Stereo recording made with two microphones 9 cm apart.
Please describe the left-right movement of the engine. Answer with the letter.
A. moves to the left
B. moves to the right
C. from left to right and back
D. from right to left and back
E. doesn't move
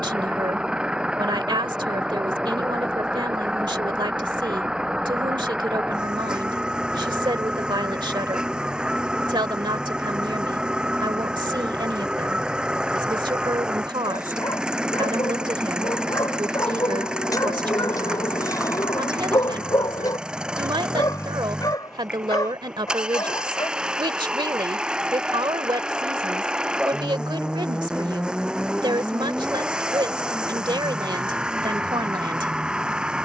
E.